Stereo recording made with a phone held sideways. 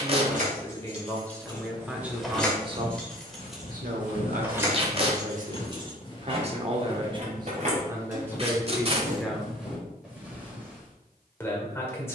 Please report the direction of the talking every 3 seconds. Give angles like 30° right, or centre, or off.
centre, 60° right, 20° right, 10° left.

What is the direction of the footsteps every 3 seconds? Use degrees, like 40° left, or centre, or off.
centre, 50° left, 20° left, 10° right.